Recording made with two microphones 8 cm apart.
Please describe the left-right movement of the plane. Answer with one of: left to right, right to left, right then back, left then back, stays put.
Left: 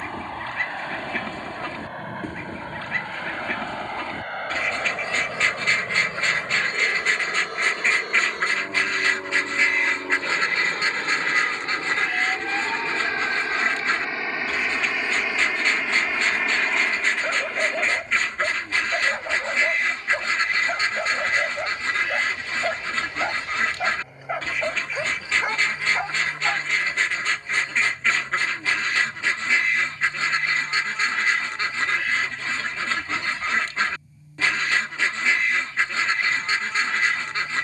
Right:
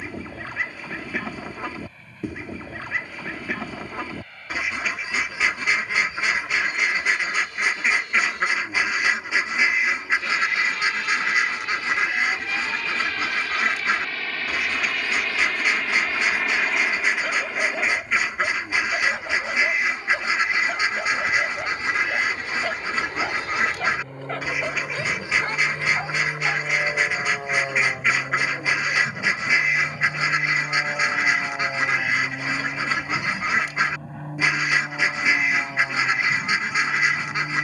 left to right.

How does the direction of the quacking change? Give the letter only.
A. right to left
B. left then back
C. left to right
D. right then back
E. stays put
E.